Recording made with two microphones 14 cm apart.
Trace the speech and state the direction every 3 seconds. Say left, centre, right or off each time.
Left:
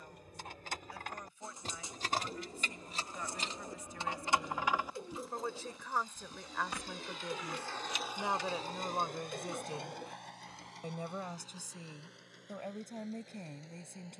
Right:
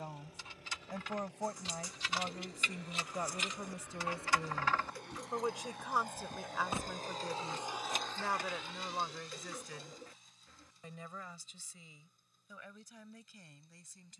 right, right, centre, left, left.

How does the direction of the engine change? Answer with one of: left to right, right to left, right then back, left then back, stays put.
right to left.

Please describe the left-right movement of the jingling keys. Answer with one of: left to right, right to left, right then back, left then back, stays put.
left to right.